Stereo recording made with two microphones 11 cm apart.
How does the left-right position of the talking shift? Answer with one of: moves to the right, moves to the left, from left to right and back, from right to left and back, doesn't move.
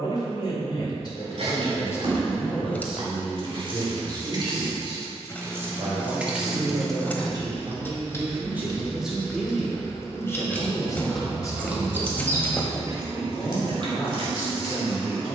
from left to right and back.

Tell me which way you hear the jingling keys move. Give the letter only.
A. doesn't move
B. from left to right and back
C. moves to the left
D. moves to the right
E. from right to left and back
E.